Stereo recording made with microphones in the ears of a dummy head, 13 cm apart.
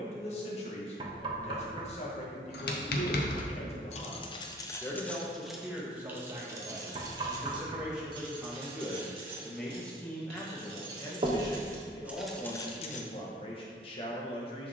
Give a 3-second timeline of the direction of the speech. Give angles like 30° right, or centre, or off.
50° left, 30° left, 10° right, 10° left, 40° left.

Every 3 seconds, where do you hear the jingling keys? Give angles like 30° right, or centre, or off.
80° left, 30° left, 30° right, 40° right, 20° left.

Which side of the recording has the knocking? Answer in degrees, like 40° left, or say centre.
40° right.